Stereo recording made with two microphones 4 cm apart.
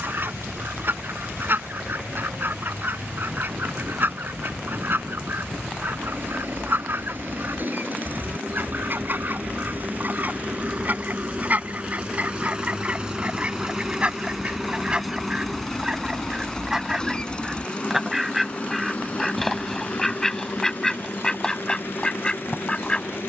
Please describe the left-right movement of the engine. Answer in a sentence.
In this clip you hear the engine travel towards the left.